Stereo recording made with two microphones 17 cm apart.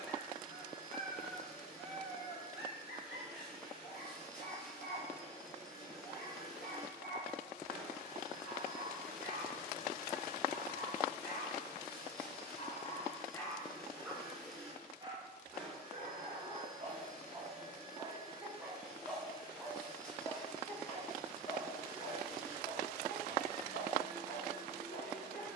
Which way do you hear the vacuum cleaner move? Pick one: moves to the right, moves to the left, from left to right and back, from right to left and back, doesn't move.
doesn't move.